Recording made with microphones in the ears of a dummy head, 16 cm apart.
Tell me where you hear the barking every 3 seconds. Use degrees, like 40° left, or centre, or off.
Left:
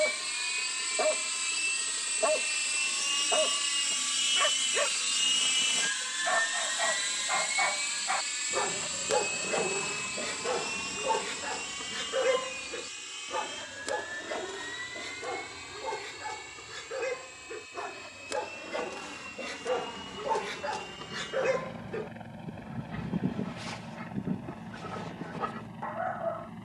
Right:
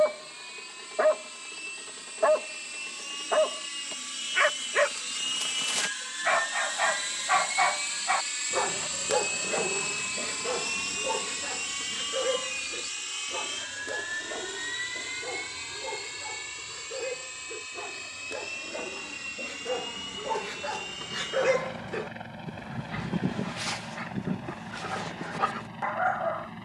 60° right, 60° right, 40° right, 10° left, 40° left, 50° left, 30° left, 40° right, 60° right.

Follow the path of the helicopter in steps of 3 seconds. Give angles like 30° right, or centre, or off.
60° left, 30° left, centre, 20° right, 30° right, 40° right, 50° right, 50° right, 50° right.